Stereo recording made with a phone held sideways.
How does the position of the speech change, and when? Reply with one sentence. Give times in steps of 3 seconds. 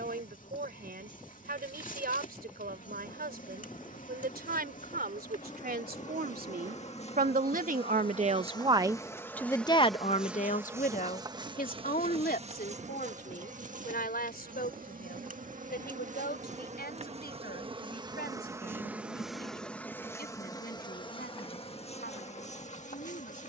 You can hear the speech on the right from 0 s and on the left from 9 s.